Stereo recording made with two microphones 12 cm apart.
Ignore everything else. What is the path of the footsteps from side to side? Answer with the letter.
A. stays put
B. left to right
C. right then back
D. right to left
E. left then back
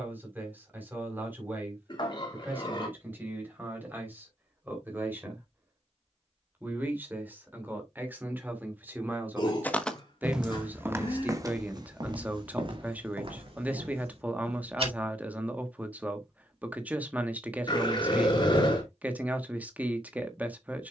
B.